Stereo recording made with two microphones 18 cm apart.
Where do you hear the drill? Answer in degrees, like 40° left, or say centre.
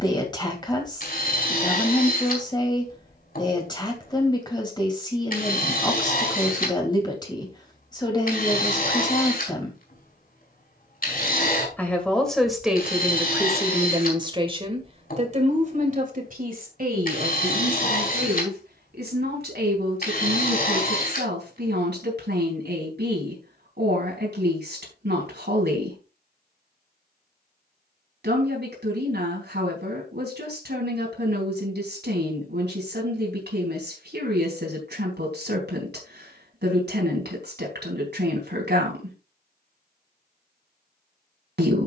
60° left.